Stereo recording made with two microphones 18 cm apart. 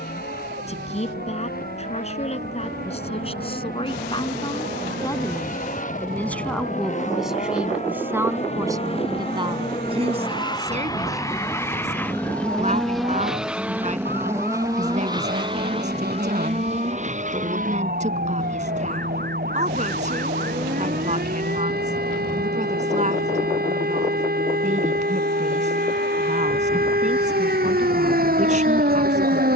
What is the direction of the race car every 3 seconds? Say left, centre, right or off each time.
left, left, left, left, centre, right, right, right, right, right.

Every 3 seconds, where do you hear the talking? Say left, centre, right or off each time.
left, left, centre, right, right, right, right, right, right, right.